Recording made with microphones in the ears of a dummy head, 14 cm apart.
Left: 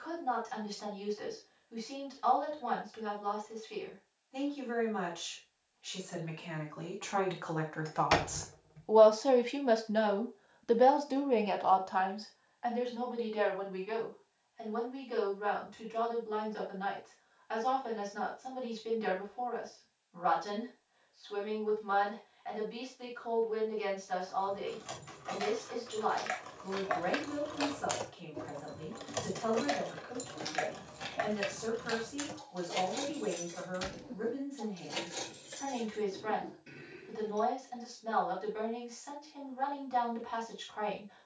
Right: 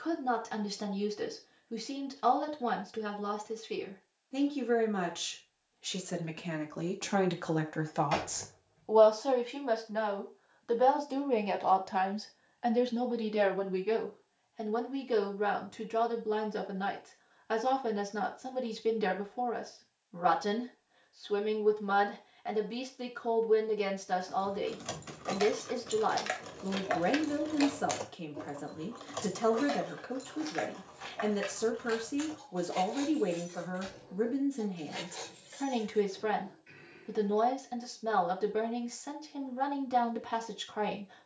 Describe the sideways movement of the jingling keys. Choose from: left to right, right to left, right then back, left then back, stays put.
right to left.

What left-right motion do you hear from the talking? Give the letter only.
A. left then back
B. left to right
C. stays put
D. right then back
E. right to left
A.